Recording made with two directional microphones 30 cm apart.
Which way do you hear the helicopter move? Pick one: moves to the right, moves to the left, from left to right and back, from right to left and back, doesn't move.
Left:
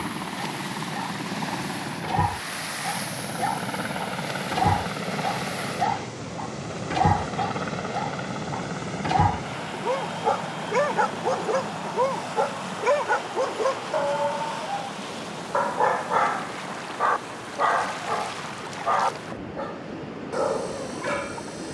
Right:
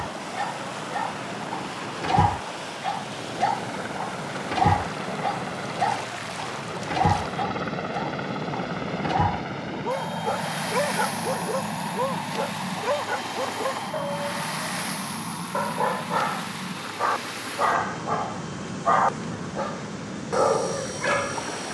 moves to the right.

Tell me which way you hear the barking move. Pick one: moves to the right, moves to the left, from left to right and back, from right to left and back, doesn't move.
from right to left and back.